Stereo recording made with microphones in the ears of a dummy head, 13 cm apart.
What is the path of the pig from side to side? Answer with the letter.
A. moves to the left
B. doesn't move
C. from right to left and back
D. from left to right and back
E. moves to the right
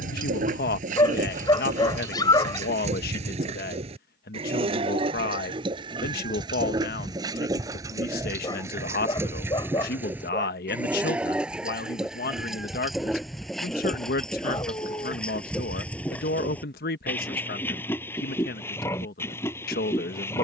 A.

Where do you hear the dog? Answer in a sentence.
In this clip you hear the dog on the left.